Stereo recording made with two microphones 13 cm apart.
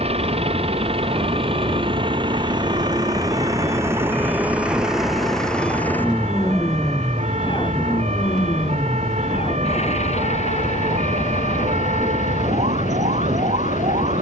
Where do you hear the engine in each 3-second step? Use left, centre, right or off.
right, centre, left, left, left.